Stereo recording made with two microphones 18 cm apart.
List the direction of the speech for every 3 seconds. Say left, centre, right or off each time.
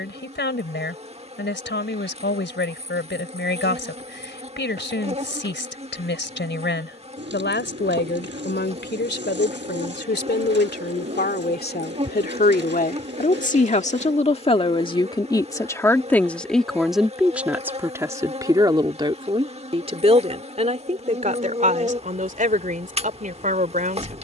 left, left, left, left, left, centre, right, right.